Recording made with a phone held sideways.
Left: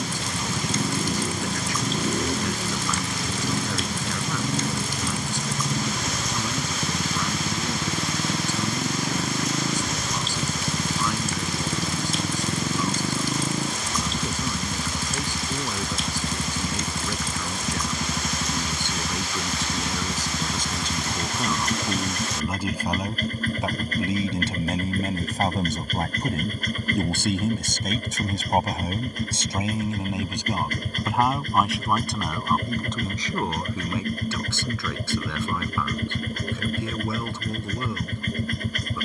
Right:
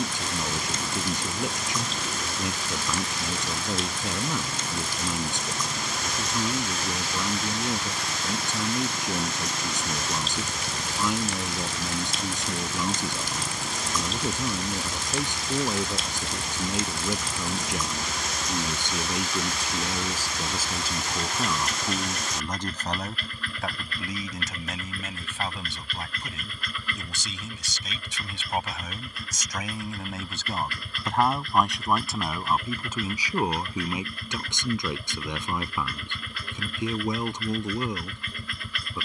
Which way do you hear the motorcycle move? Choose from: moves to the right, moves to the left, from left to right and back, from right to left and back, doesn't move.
doesn't move.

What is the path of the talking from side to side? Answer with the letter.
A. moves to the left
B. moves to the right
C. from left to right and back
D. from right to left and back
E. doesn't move
D.